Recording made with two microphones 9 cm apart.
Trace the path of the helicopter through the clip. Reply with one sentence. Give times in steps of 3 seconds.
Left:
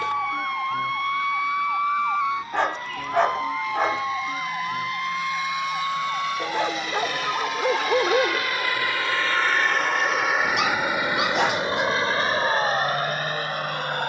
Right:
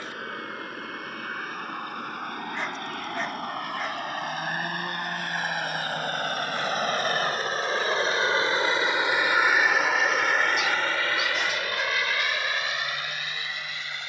In this clip you hear the helicopter on the right from 0 s, in the centre from 9 s and on the left from 12 s.